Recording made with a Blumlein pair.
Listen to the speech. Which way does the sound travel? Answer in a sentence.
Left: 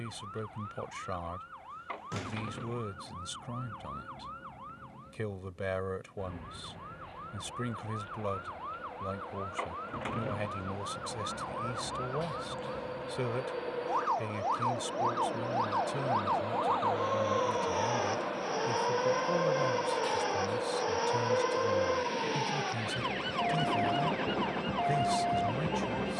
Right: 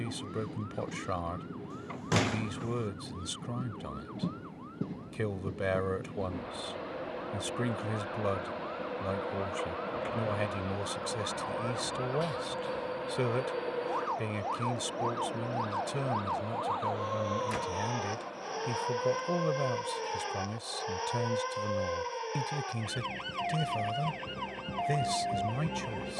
In this clip you hear the speech stay put.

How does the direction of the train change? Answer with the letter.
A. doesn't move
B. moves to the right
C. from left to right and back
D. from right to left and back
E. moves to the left
E.